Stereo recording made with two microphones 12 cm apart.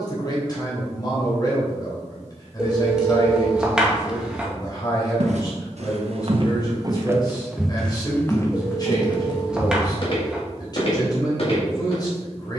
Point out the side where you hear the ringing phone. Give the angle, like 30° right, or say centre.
10° right.